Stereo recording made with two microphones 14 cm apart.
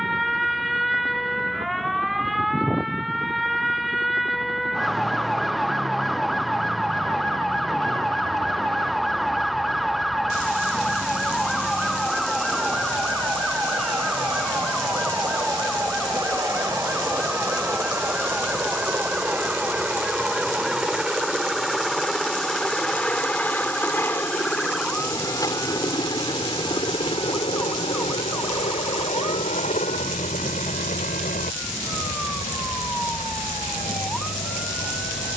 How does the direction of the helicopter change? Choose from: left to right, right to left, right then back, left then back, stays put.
right to left.